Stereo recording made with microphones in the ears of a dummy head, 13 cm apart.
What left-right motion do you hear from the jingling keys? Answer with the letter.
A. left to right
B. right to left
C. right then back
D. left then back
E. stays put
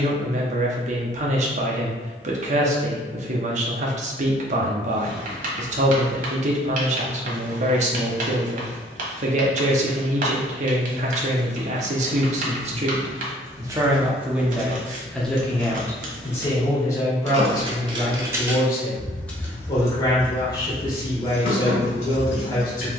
B.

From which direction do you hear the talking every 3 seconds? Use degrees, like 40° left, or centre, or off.
50° right, 50° right, 50° right, 50° right, 30° right, 20° left, 30° left, 30° left.